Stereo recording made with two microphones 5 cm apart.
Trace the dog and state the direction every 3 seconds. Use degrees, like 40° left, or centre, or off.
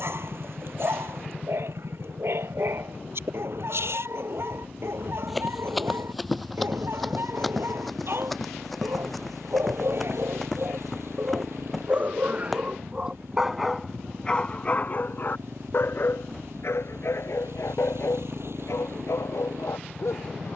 60° right, 60° right, 60° right, 50° right, centre, 60° left, 80° left.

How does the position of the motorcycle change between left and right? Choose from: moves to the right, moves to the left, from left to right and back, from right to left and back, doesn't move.
doesn't move.